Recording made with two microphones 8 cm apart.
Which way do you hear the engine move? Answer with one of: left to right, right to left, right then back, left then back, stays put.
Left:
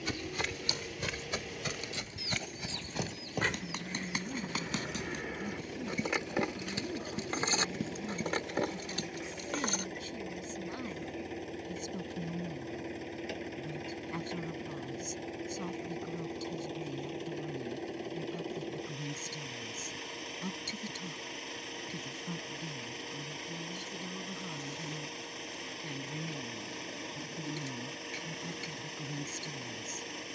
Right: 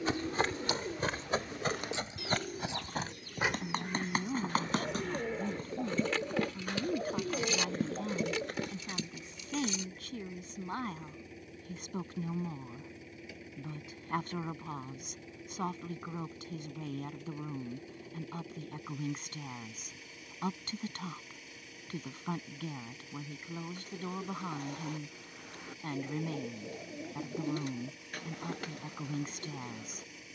stays put.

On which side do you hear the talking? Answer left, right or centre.
right.